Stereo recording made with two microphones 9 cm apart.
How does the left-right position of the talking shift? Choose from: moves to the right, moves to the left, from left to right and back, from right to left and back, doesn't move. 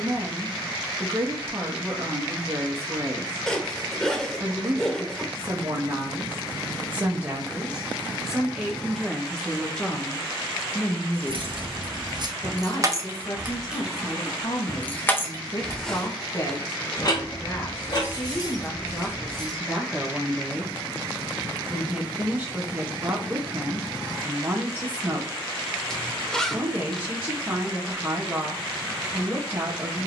from right to left and back.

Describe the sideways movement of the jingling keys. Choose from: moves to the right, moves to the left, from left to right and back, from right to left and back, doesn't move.
moves to the left.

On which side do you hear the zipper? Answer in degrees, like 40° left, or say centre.
10° left.